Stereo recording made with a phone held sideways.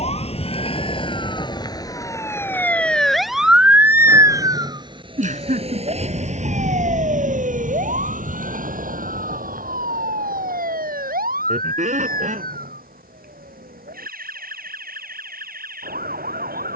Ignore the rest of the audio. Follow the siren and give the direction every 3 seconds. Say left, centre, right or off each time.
left, right, right, right, right, right.